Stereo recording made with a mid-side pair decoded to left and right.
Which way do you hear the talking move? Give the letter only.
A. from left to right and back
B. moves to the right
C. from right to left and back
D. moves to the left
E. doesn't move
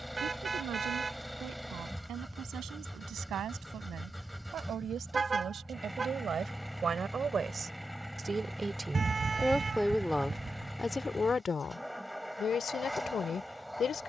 D.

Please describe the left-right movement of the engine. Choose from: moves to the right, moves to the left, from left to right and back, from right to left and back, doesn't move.
doesn't move.